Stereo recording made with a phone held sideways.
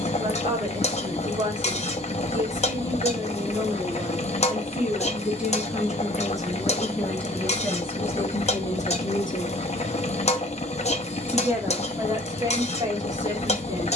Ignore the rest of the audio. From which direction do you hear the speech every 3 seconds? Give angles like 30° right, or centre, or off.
30° right, 10° right, 10° left, 10° left, 30° right.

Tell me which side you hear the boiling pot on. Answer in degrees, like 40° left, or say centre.
50° left.